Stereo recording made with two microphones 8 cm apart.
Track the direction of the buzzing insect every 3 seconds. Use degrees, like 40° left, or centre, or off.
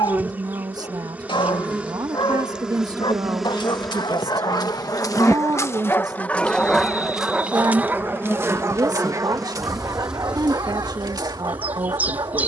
20° right, centre, 30° left, 10° right.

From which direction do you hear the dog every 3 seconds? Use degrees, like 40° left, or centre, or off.
70° left, 50° left, 10° right, 50° right.